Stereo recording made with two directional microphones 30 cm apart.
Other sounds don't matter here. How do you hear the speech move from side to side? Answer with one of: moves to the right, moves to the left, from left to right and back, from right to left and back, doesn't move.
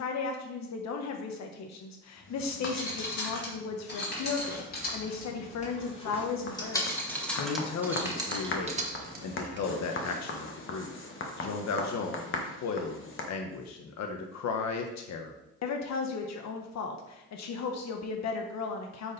doesn't move.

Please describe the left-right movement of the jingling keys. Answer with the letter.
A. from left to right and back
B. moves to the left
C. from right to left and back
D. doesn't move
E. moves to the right
E.